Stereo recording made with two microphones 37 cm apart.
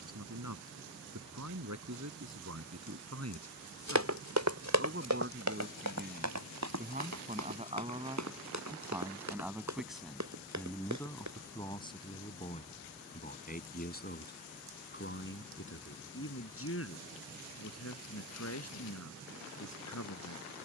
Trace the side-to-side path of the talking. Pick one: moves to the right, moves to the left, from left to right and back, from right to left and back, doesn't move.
moves to the left.